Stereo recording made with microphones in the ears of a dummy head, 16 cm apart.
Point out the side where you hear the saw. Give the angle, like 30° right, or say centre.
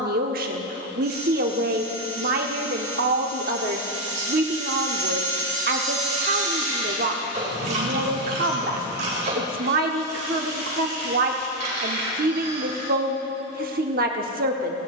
40° right.